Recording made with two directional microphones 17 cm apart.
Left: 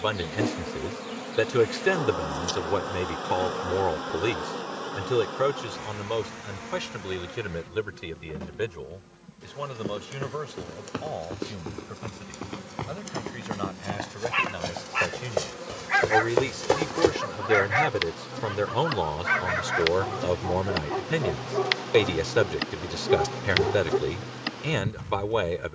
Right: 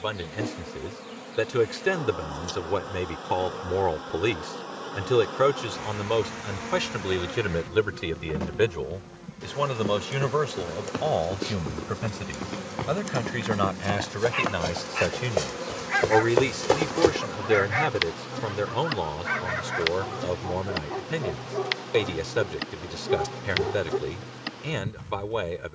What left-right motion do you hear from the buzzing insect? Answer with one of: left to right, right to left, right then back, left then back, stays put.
right then back.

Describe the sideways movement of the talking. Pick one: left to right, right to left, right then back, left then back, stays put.
right then back.